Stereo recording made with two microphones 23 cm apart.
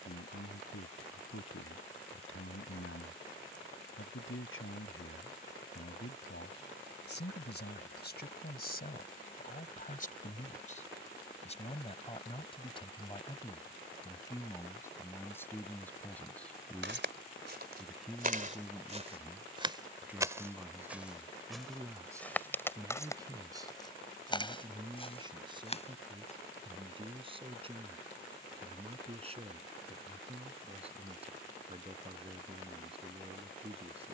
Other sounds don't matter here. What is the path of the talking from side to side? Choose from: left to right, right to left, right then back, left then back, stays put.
left to right.